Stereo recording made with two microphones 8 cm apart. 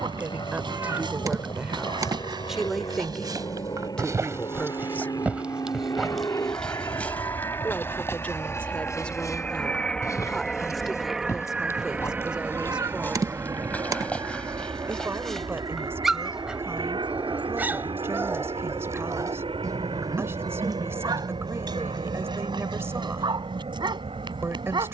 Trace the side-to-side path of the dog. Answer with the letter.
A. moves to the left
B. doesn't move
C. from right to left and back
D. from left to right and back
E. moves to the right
C.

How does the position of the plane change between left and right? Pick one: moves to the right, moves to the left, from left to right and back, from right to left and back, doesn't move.
moves to the right.